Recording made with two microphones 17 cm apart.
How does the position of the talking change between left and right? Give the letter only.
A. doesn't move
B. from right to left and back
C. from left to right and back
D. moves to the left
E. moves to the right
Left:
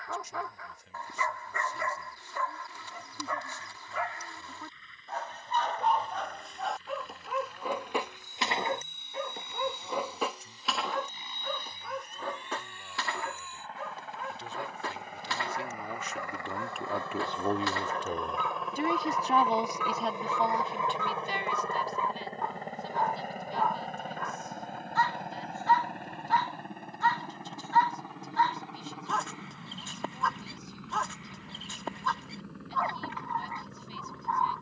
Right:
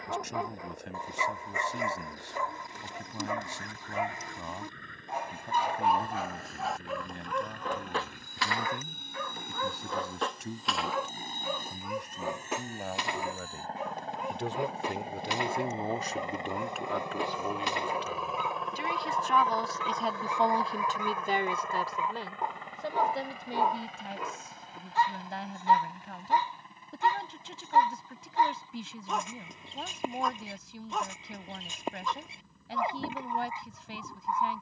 B.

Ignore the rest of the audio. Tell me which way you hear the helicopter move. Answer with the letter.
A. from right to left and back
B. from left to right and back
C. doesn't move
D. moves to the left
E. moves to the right
D.